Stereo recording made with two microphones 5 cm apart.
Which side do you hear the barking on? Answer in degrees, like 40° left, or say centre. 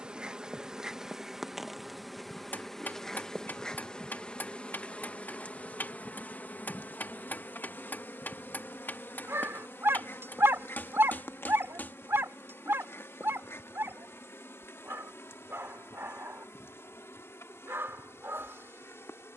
60° right.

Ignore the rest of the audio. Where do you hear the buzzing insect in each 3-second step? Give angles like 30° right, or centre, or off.
10° right, 20° left, 40° left, 60° left, 60° left, 70° left, 70° left.